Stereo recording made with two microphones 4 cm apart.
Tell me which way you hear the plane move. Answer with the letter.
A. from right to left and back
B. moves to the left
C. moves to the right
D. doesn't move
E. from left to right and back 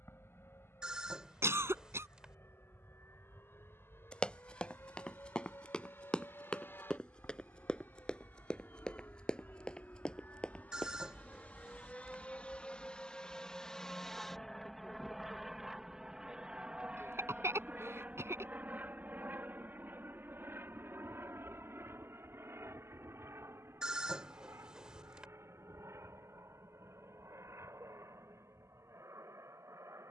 C.